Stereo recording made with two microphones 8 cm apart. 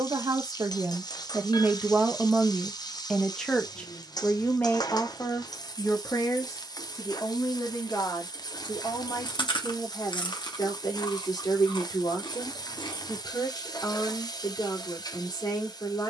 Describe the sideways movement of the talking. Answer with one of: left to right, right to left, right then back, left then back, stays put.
right to left.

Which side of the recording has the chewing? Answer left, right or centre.
left.